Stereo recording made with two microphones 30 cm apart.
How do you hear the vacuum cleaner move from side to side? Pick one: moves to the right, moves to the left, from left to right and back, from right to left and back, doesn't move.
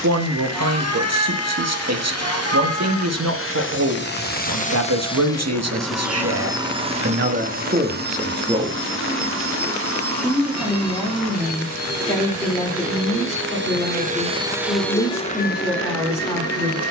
from left to right and back.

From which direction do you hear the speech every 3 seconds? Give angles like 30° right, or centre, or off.
70° right, 70° right, 40° right, centre, 10° left, 10° left.